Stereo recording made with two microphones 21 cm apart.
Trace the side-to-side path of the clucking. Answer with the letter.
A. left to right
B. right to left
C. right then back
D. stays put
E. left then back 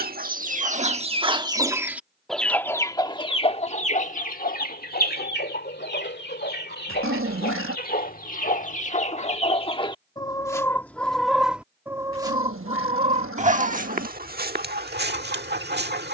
E.